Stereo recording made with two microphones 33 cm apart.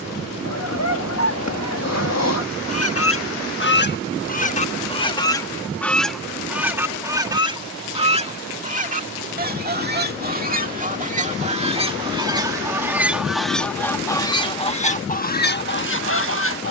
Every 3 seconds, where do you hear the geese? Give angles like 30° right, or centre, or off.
50° left, 20° left, 10° right, 20° right, centre, 30° left.